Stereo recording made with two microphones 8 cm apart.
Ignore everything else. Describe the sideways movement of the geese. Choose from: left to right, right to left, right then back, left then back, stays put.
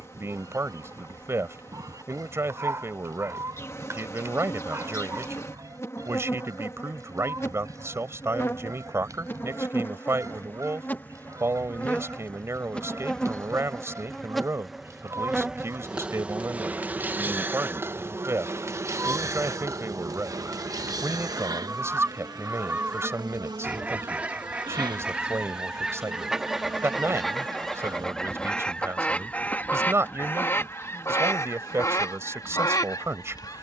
right to left.